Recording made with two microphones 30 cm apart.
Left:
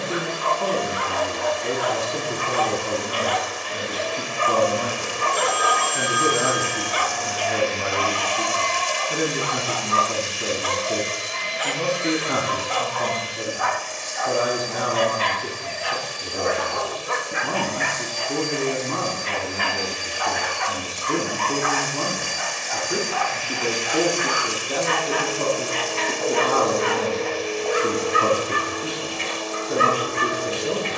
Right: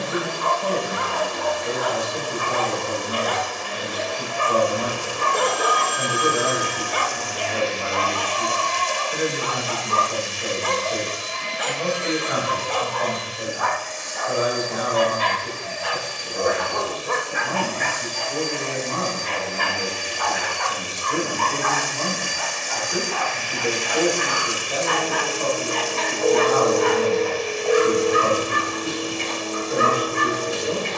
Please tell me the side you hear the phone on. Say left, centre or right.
centre.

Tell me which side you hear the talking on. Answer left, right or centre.
left.